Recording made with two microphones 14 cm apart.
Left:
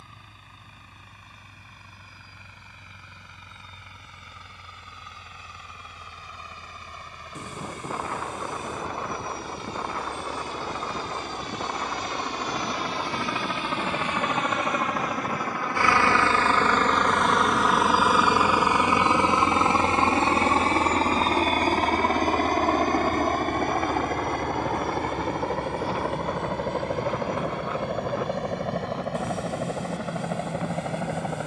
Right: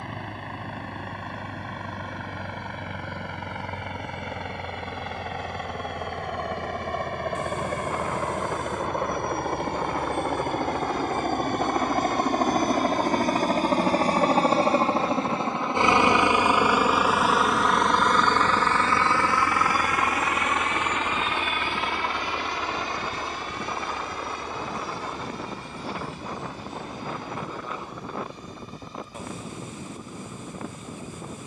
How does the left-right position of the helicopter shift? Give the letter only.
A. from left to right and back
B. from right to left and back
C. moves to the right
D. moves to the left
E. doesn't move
D.